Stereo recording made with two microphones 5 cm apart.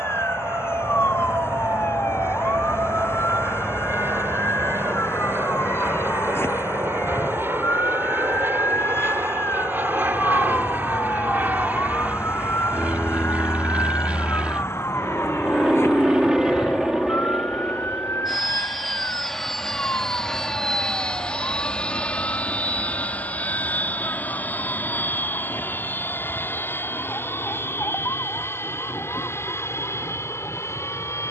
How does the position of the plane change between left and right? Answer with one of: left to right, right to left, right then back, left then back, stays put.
right to left.